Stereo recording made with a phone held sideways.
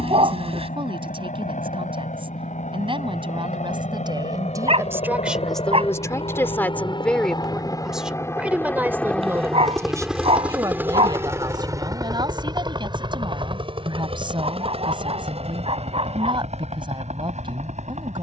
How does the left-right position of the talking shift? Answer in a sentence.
You can hear the talking go left and come back.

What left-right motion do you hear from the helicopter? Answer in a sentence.
You can hear the helicopter move from left to right.